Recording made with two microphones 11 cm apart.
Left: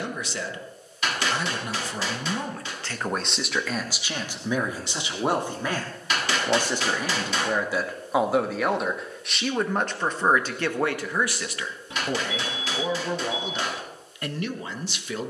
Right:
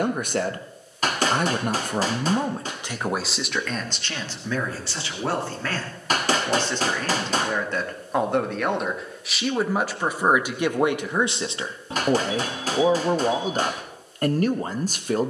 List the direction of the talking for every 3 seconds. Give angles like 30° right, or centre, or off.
40° right, 10° left, 10° left, 10° right, 40° right.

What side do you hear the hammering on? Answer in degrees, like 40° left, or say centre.
40° right.